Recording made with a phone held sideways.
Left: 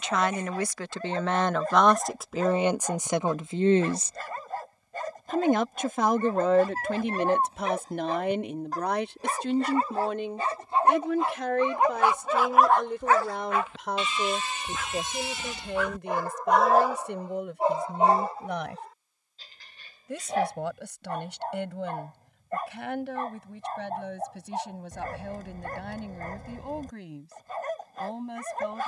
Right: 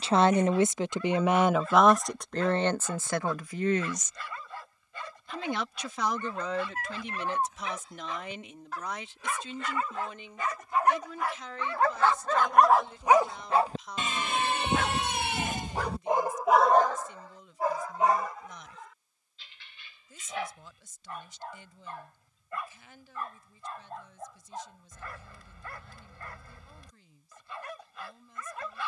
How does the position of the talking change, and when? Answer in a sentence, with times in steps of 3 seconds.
In this clip you hear the talking in the centre from 0 s and on the left from 3 s.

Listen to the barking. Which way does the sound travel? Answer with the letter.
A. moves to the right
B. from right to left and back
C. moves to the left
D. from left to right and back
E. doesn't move
D.